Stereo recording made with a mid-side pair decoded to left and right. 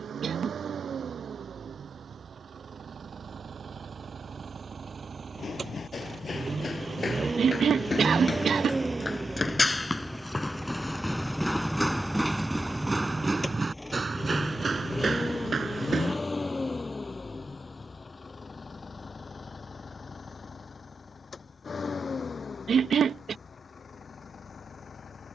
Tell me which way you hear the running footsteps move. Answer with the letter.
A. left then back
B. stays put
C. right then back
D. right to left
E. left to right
E.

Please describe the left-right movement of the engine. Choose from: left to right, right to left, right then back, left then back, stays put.
right to left.